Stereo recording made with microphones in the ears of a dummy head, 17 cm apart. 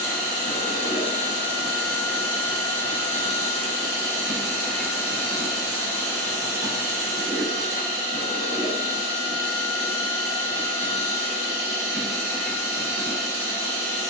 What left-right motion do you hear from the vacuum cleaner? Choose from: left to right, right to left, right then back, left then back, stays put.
stays put.